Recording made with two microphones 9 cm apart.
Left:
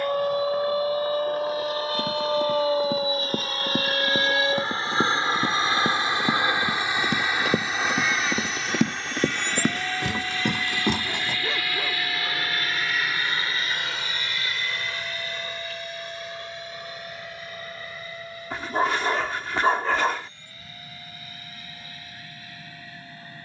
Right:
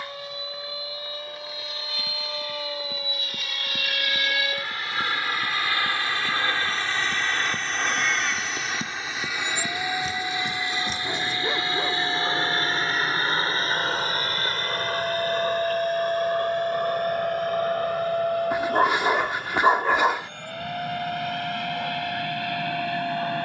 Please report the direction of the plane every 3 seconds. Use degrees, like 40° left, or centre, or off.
50° left, 30° left, 10° left, 10° right, 30° right, 50° right, 50° right, 60° right.